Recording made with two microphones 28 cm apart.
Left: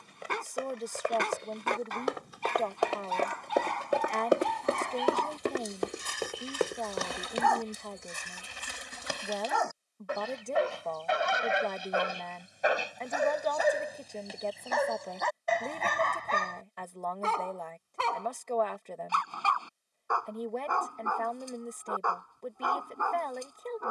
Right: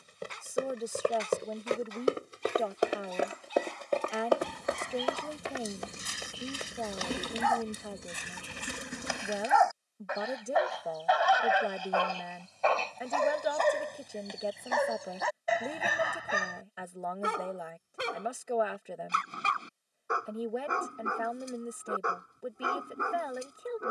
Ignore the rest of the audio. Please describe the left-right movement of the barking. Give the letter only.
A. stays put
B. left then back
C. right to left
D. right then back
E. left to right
E.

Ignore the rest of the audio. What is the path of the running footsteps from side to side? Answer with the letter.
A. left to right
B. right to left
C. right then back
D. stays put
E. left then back
B.